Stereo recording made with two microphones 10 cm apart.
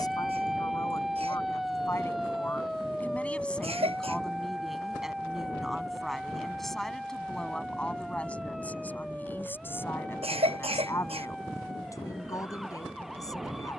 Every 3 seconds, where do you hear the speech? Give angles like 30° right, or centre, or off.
30° left, centre, 10° left, 20° left, 30° left.